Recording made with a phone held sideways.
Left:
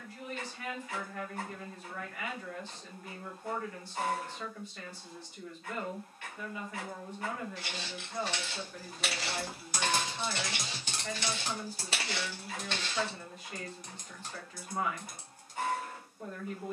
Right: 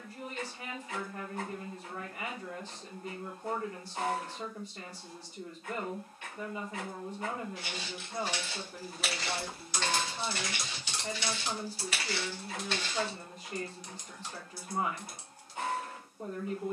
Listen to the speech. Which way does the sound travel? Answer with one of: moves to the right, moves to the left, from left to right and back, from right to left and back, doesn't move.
doesn't move.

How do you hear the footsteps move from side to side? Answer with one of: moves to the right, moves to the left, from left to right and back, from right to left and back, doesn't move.
from right to left and back.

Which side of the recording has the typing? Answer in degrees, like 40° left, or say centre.
50° left.